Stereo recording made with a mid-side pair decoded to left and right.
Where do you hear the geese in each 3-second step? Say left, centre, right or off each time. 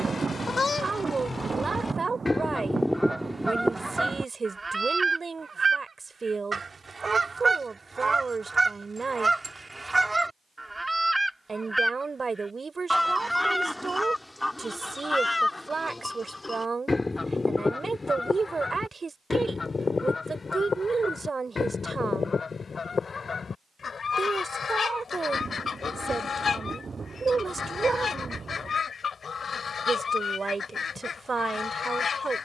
left, centre, right, centre, centre, left, left, left, left, left, left.